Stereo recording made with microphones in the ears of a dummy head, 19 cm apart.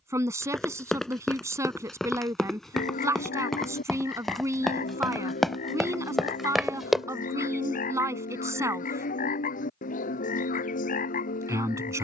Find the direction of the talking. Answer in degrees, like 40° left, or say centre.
10° right.